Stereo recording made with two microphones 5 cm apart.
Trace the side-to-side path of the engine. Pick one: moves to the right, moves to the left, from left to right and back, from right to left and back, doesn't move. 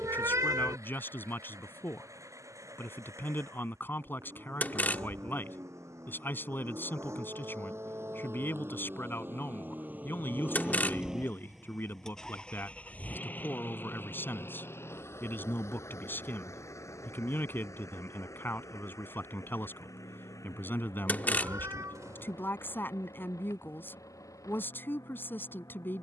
moves to the left.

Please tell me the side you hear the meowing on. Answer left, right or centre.
right.